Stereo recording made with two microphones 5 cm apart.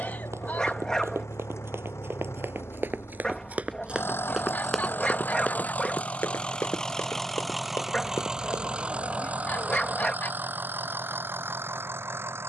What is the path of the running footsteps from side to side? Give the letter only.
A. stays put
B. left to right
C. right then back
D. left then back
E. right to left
E.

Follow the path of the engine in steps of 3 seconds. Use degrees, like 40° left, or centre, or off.
70° left, 50° left, centre, 40° right.